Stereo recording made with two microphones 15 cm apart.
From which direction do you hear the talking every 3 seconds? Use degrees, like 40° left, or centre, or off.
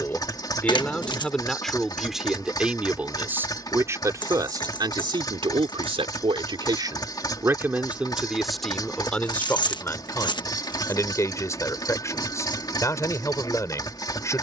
centre, 30° right, 20° right, 20° left, 20° left.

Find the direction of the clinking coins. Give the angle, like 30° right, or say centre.
30° left.